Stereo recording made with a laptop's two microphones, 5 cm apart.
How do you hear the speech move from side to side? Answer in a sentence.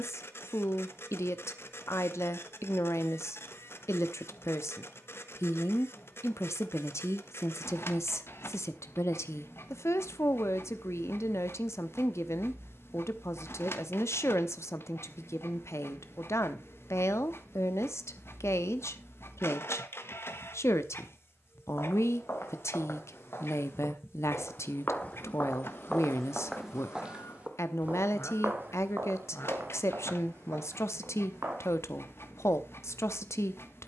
You can hear the speech stay in one place.